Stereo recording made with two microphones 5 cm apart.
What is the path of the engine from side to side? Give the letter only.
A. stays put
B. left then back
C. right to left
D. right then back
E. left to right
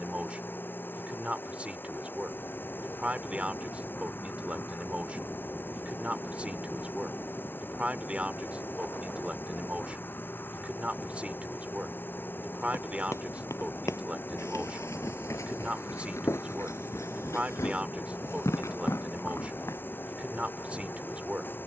A.